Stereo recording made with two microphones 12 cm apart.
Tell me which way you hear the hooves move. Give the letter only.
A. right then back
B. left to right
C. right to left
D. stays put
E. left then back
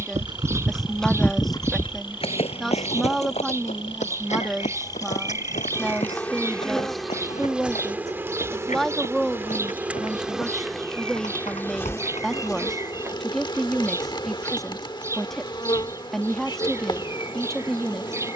C.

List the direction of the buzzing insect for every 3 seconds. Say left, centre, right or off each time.
left, left, centre, centre, left, left.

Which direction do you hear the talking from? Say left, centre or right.
centre.